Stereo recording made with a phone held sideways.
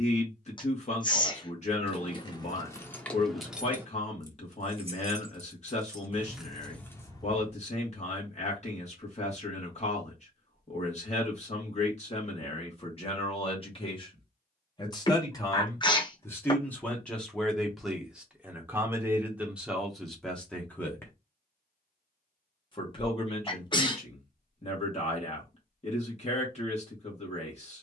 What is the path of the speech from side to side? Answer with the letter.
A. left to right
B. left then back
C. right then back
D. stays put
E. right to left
C.